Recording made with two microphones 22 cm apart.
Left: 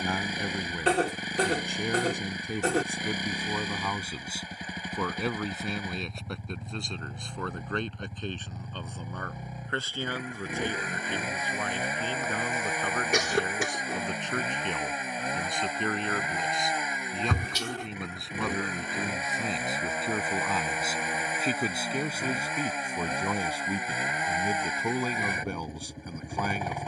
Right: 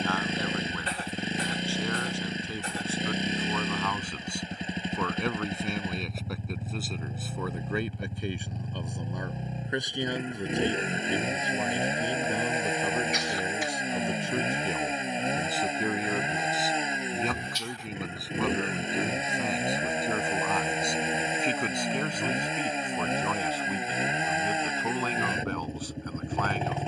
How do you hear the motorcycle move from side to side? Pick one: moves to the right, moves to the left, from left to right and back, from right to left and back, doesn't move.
doesn't move.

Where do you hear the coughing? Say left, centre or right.
left.